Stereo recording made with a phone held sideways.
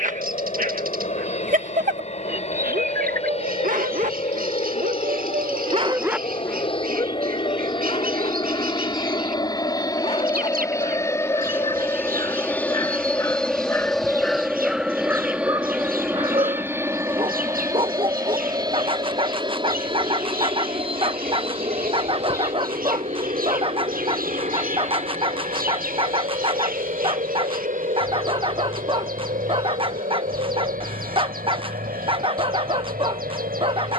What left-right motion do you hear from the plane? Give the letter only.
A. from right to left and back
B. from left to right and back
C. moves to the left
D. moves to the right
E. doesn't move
D.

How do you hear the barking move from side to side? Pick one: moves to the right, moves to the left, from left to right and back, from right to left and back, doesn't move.
from right to left and back.